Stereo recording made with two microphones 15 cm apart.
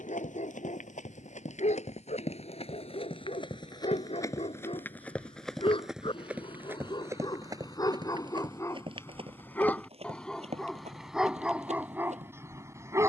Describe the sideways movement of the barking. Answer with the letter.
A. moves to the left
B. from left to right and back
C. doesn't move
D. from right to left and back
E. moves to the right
E.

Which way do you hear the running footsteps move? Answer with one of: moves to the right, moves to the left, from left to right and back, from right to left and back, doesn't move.
moves to the right.